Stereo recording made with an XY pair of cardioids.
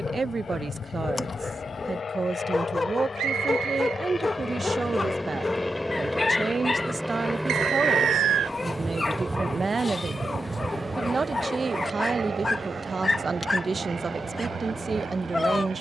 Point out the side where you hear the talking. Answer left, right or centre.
right.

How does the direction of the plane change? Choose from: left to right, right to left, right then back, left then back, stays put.
left to right.